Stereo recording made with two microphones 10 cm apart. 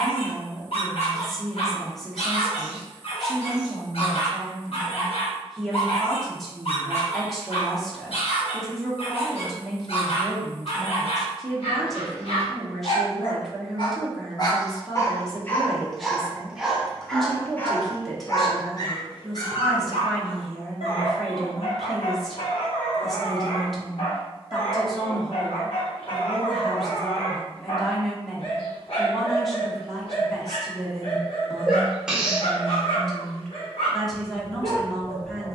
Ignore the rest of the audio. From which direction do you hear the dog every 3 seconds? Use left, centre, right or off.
left, left, left, left, left, centre, left, left, left, left, left, left.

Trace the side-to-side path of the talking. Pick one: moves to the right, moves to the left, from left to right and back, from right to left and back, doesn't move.
doesn't move.